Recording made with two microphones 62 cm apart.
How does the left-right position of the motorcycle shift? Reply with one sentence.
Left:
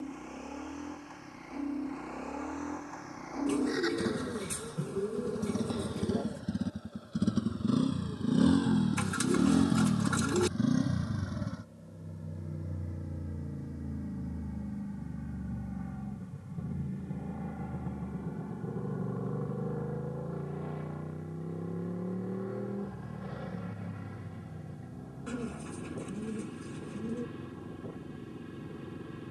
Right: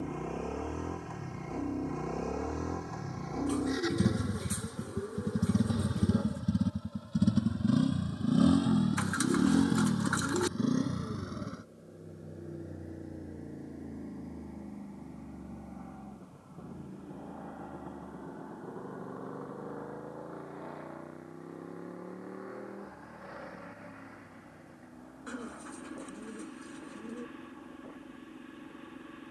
In this clip you hear the motorcycle move from right to left.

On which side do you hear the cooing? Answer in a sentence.
In this clip you hear the cooing on the left.